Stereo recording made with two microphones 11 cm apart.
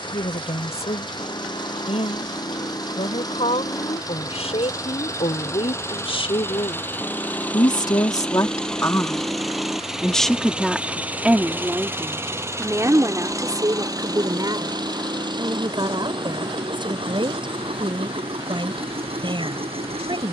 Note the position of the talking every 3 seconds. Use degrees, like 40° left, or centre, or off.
80° left, 70° left, 50° left, centre, 30° right, 50° right, 50° right.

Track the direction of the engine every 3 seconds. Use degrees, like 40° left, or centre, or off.
40° left, 30° left, 10° left, 10° right, 30° right, 50° right, 60° right.